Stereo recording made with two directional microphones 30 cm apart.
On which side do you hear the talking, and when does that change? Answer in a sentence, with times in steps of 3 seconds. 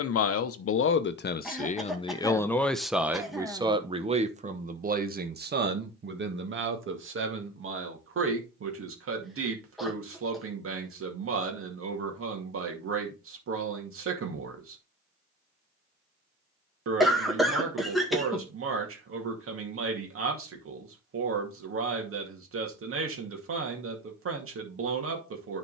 In this clip you hear the talking on the left from 0 s and on the right from 3 s.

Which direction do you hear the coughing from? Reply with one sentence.
You can hear the coughing in the centre.